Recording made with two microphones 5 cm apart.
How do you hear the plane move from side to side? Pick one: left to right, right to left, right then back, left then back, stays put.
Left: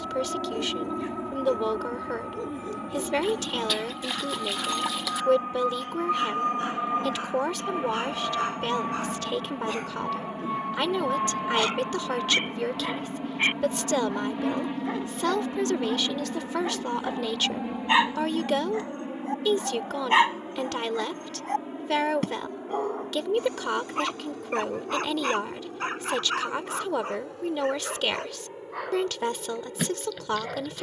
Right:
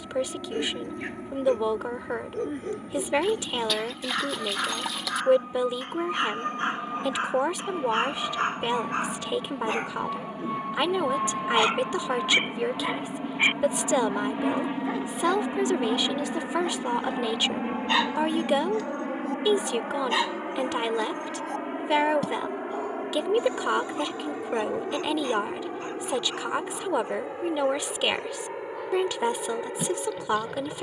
left to right.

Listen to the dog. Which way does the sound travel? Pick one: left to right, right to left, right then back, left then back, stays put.
right to left.